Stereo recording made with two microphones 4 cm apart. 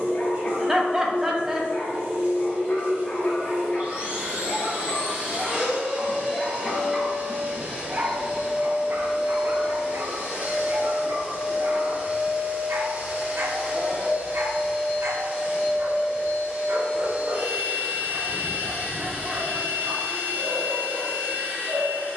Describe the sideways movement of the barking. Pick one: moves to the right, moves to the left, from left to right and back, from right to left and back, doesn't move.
moves to the right.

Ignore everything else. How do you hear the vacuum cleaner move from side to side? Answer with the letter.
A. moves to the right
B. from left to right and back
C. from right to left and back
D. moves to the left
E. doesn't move
E.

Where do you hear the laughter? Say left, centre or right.
centre.